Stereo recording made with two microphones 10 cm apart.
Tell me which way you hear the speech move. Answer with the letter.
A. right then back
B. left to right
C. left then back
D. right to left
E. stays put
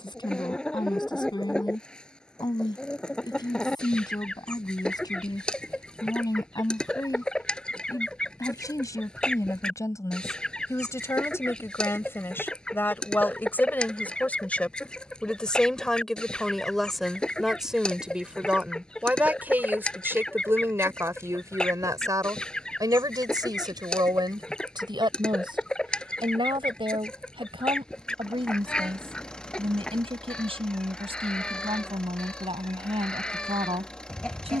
B.